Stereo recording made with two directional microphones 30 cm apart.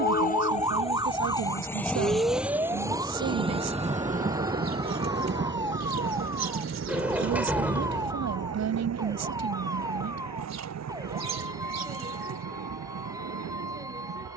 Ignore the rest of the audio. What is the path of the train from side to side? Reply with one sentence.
In this clip you hear the train travel towards the right.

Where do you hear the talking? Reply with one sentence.
You can hear the talking on the right.